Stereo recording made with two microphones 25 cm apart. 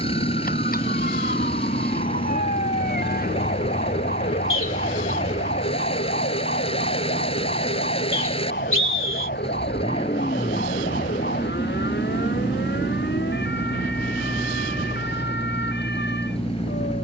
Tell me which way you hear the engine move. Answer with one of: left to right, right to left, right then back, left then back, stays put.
stays put.